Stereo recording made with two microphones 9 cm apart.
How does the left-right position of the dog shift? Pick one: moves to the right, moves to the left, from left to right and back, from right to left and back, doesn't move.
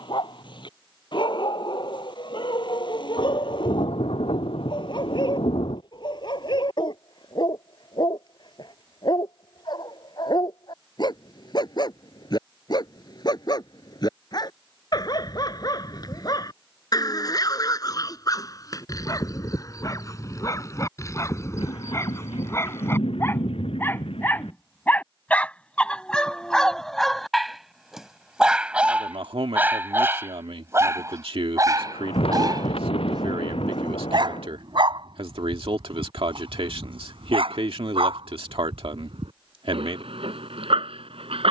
moves to the right.